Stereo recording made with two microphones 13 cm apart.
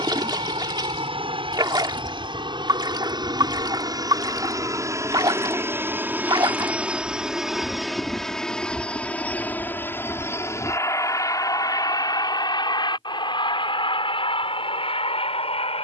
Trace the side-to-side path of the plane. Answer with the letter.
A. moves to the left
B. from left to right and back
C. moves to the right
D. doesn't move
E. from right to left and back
A.